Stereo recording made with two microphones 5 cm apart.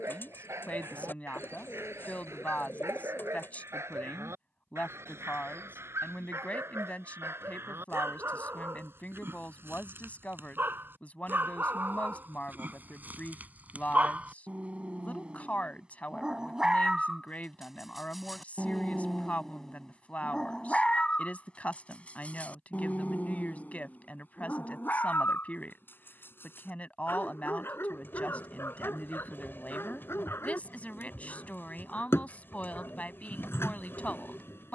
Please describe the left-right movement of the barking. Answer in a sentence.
In this clip you hear the barking go from the right side to the left.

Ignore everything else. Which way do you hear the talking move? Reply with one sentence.
In this clip you hear the talking stay put.